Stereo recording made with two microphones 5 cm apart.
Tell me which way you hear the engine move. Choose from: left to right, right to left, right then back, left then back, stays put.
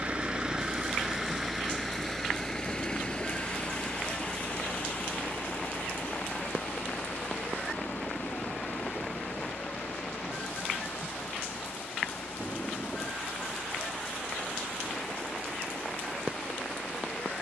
right to left.